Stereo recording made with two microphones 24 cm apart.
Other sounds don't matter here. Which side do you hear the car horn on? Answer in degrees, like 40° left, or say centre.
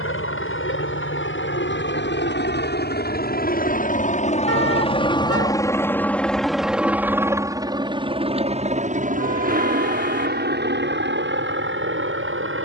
80° left.